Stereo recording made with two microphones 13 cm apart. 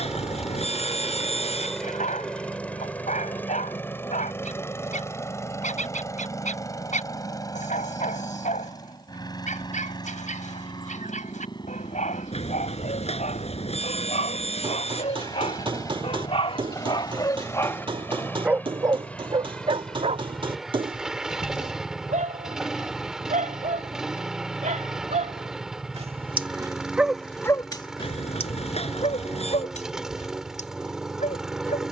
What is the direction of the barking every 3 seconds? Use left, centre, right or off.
left, left, left, left, left, left, right, right, right, left, left.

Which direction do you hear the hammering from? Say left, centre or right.
right.